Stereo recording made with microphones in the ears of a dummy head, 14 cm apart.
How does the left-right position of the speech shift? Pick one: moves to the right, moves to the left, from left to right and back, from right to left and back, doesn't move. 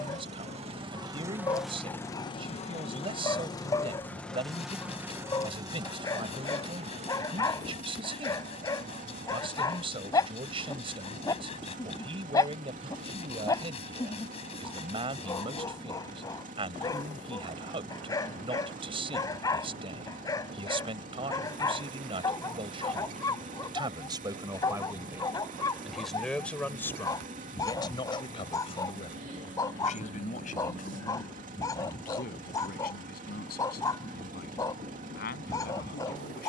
moves to the left.